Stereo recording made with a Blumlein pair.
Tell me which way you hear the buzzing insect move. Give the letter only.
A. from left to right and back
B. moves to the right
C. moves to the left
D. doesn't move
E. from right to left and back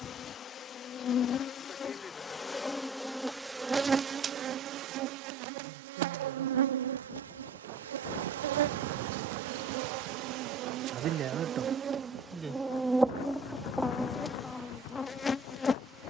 A.